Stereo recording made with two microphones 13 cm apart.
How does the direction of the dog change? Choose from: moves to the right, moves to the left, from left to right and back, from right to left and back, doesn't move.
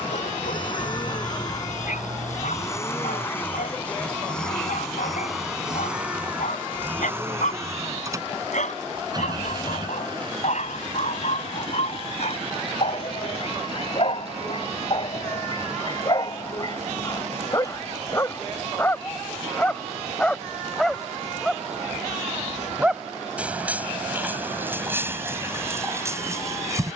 moves to the right.